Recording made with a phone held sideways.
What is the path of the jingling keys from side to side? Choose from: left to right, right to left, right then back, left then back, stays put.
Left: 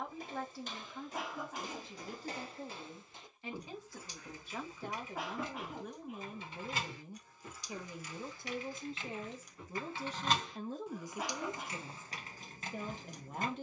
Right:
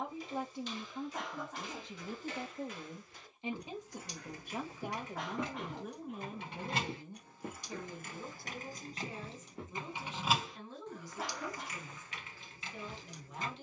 right to left.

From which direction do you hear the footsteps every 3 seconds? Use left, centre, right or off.
left, centre, right, right, off.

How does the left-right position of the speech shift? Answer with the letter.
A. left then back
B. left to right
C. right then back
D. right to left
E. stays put
D.